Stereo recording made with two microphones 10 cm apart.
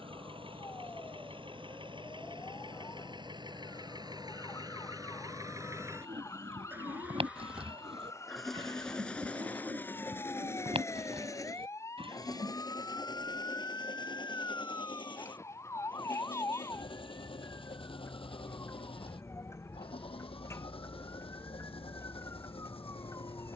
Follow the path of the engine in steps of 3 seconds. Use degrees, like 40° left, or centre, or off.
60° right, 40° right, 10° right, 20° left, 50° left, 60° left, 60° left, 70° left.